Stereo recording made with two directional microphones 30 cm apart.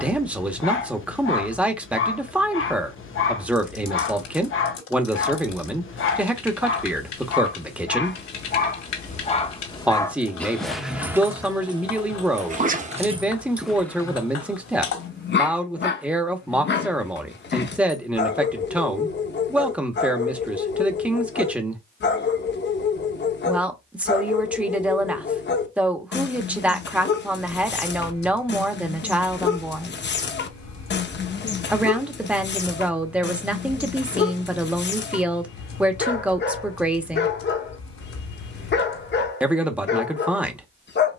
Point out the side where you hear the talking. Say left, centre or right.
centre.